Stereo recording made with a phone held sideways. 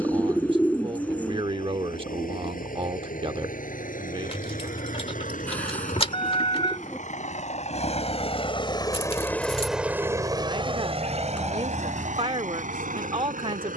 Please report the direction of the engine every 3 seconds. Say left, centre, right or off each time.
left, left, left, right, right.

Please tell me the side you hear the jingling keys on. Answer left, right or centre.
left.